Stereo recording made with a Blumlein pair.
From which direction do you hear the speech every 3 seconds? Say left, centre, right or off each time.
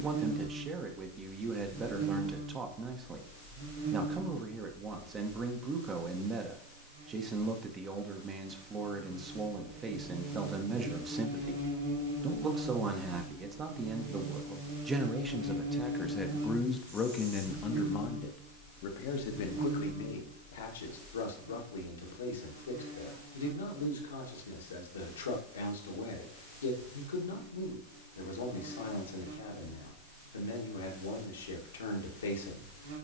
right, right, right, right, right, centre, left, left, left, left, left.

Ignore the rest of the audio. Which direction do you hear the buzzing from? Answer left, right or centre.
right.